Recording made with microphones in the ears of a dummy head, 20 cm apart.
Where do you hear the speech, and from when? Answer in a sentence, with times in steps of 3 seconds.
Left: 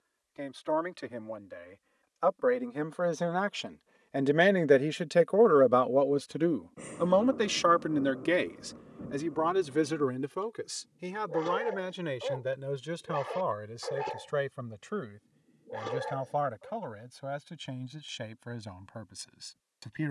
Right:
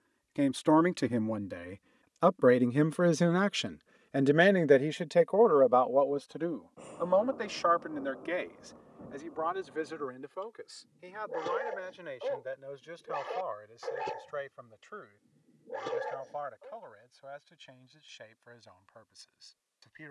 You can hear the speech on the right from 0 s, in the centre from 3 s and on the left from 6 s.